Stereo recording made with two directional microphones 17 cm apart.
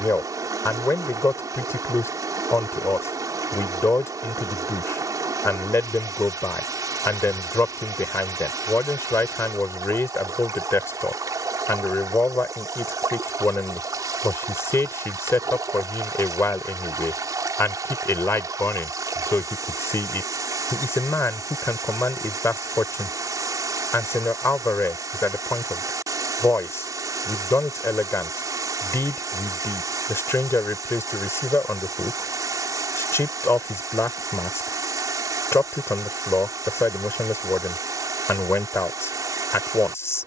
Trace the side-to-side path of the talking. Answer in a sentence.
You can hear the talking stay put.